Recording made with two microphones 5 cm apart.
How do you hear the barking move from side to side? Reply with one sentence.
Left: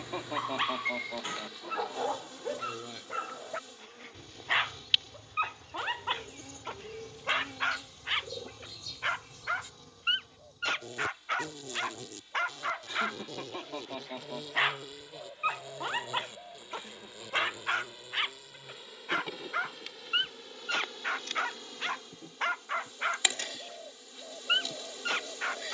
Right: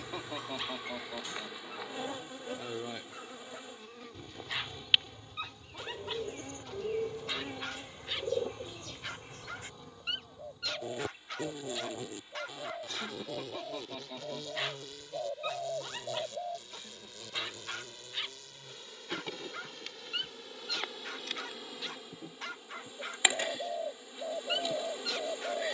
In this clip you hear the barking stay in one place.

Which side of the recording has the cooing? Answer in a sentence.
In this clip you hear the cooing on the right.